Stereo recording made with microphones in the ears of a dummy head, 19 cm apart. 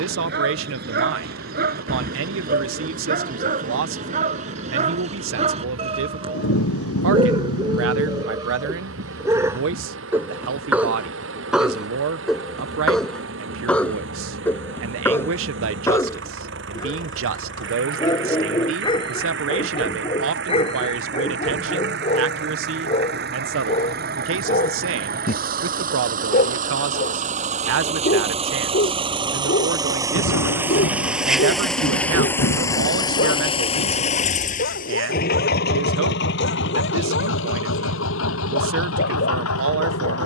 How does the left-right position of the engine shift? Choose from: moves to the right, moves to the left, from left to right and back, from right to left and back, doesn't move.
moves to the left.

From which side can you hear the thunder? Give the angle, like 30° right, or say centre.
90° left.